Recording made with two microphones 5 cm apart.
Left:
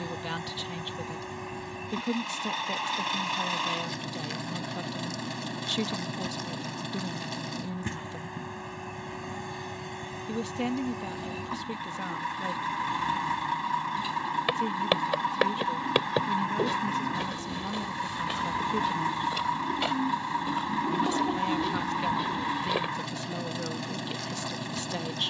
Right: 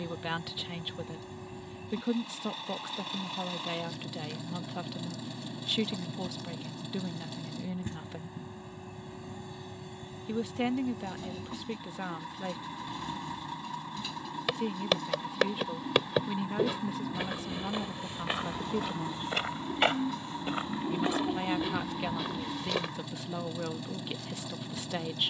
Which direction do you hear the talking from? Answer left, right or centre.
centre.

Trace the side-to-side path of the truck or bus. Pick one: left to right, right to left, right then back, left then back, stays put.
stays put.